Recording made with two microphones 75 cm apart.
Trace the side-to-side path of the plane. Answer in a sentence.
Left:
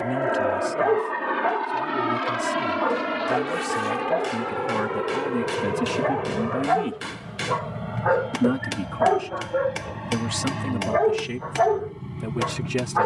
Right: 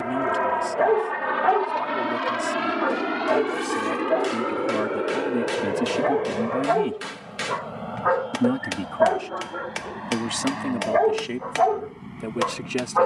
In this clip you hear the plane travel towards the left.